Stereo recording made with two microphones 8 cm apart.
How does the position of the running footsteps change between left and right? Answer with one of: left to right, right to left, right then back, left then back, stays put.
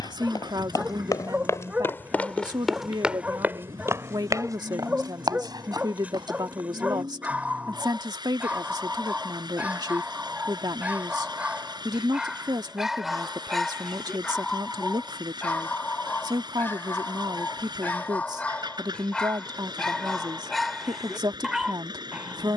left to right.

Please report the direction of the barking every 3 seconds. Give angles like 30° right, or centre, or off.
20° right, 20° right, 20° right, 20° right, centre, 20° left, 10° left, 10° right.